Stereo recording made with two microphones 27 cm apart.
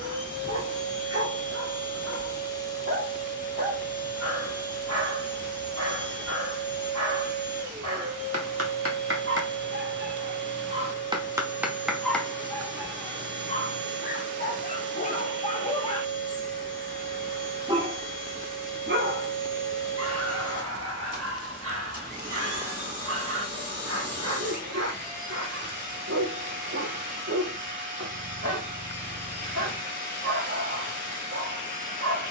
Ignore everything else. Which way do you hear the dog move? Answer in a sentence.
In this clip you hear the dog go left and come back.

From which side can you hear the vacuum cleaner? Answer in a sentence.
You can hear the vacuum cleaner on the right.